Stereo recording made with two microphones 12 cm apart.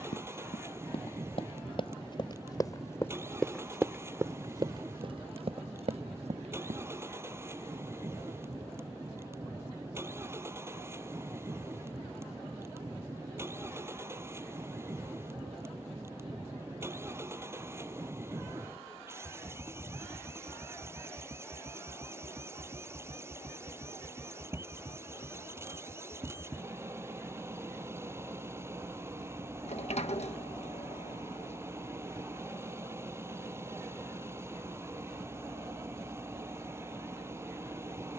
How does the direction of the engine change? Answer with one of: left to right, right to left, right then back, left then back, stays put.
stays put.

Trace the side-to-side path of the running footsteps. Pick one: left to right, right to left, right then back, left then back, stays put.
left to right.